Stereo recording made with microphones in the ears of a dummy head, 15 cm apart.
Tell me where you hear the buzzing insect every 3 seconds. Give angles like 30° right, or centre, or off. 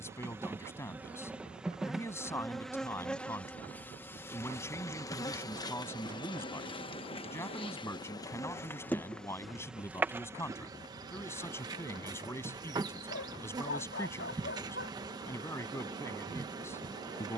10° right, 20° left, 30° left, 10° right, 20° right, 20° right.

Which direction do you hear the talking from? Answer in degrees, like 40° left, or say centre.
10° left.